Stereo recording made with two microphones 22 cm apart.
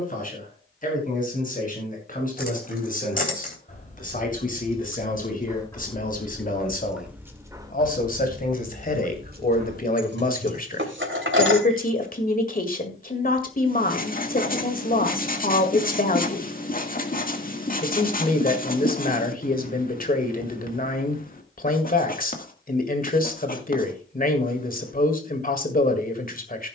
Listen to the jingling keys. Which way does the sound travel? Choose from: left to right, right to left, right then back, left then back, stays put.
left to right.